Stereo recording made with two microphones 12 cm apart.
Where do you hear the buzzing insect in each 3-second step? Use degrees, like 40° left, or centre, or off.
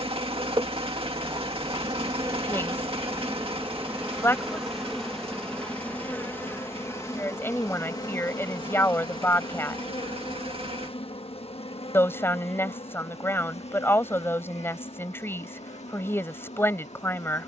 30° right, centre, 30° left, 50° left, 60° left, 70° left.